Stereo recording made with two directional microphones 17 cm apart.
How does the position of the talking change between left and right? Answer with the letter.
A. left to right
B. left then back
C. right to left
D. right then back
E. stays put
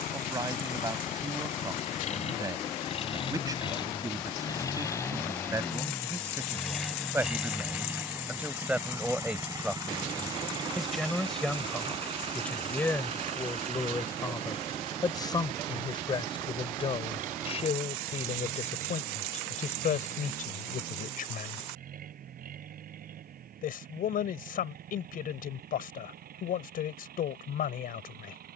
C.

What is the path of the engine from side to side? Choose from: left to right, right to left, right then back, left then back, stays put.
left to right.